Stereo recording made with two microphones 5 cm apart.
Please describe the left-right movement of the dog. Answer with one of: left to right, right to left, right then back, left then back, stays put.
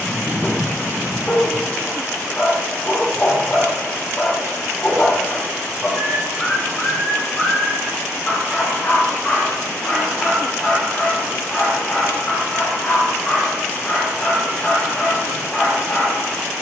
stays put.